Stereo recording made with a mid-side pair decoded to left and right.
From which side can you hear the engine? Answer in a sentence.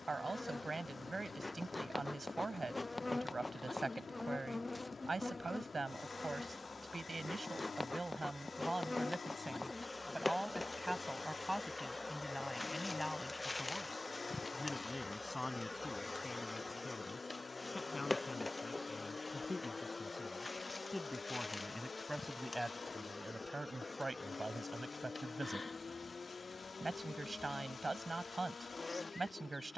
In this clip you hear the engine on the left.